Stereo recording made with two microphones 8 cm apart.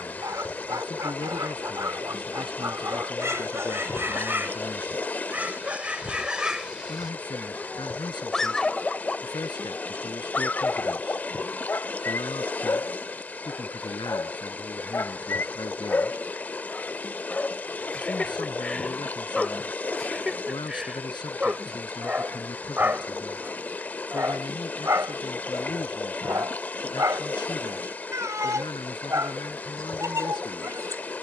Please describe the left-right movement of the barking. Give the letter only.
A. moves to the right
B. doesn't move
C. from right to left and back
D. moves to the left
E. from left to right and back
C.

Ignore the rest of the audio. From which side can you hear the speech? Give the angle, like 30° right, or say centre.
70° left.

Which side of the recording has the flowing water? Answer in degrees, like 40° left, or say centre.
20° left.